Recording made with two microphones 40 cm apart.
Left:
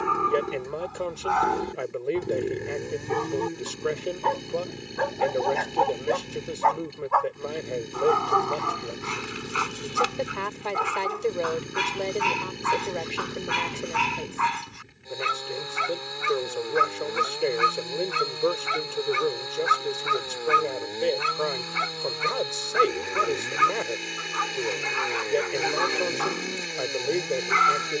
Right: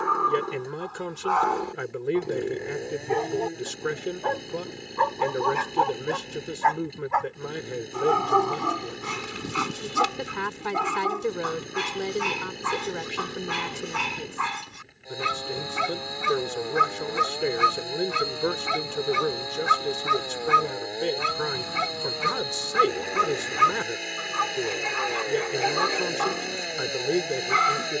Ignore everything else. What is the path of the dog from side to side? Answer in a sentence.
You can hear the dog move from left to right.